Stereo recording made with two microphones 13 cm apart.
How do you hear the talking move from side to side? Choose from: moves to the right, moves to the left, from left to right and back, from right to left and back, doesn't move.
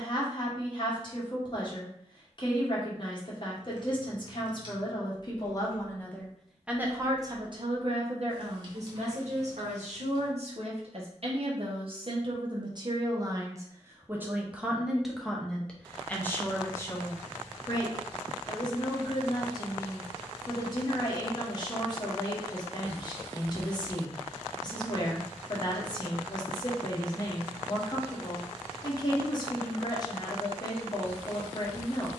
from left to right and back.